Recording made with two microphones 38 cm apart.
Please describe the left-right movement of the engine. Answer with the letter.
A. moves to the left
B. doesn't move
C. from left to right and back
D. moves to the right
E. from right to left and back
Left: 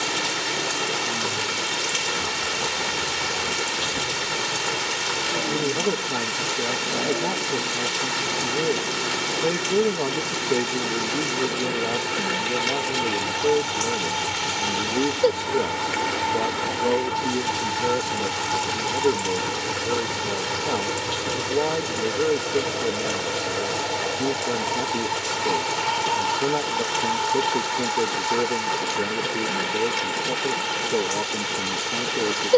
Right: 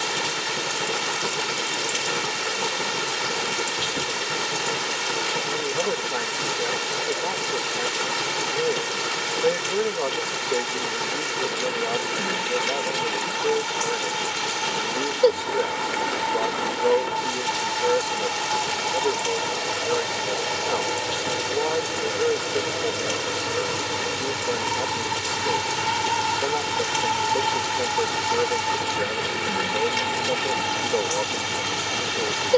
D.